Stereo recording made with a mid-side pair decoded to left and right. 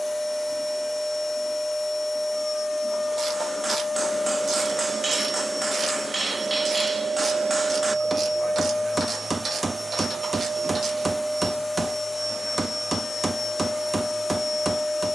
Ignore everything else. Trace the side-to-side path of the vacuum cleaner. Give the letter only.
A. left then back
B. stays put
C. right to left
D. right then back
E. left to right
D.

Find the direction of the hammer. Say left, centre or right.
right.